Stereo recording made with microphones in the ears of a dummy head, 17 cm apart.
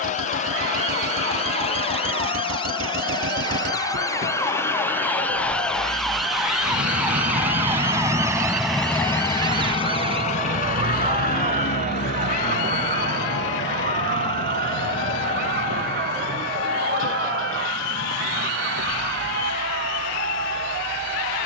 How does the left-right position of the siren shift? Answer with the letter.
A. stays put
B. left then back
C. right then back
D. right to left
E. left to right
E.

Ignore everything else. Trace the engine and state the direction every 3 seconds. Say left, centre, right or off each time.
right, right, right, left, left, left, left.